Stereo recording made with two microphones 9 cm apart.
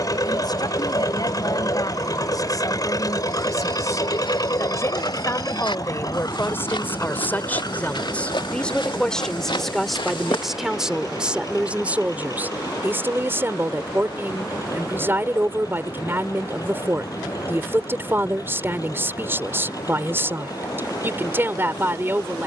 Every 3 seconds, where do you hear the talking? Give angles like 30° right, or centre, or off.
50° left, 40° left, 20° left, centre, 20° right, 30° right, 30° right, 30° right.